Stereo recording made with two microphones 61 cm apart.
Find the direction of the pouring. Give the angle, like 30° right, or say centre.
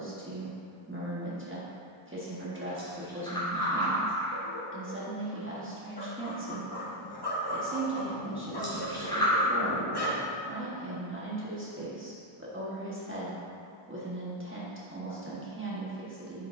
10° left.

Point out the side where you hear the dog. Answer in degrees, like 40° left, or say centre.
40° left.